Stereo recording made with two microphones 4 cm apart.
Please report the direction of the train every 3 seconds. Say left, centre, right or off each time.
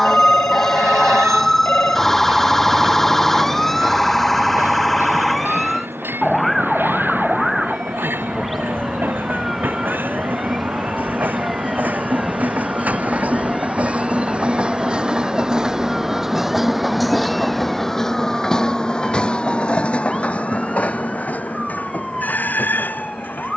right, right, right, right, right, centre, left, left.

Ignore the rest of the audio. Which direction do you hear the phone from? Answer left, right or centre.
left.